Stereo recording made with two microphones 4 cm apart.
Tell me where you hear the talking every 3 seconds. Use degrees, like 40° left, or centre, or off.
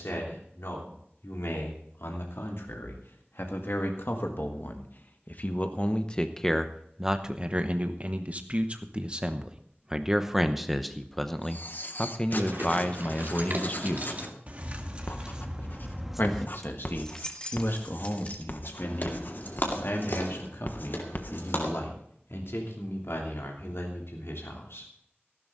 80° left, 50° left, 20° right, 10° right, 30° left, 60° left, 70° left, 80° left, 80° left.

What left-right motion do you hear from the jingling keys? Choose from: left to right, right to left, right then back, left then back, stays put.
right to left.